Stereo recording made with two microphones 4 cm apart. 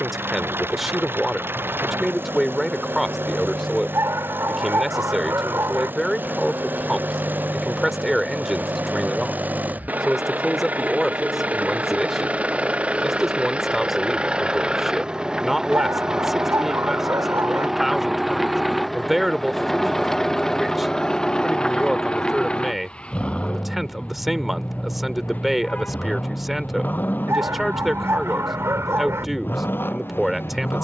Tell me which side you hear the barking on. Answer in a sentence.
You can hear the barking on the right.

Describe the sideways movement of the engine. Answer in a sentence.
In this clip you hear the engine travel towards the left.